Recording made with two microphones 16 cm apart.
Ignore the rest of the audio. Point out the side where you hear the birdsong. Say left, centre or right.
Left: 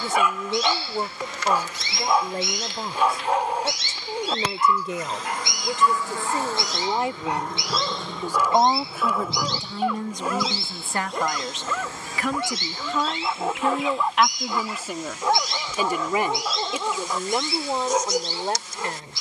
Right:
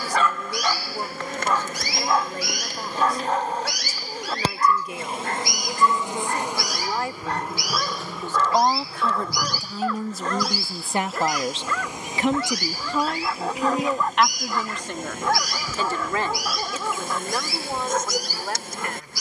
left.